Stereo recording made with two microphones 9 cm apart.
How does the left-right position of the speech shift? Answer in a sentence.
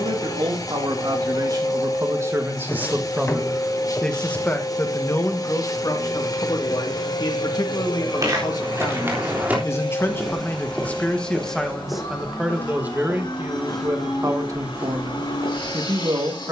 You can hear the speech move from right to left and back again.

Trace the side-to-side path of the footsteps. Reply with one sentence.
You can hear the footsteps go left and come back.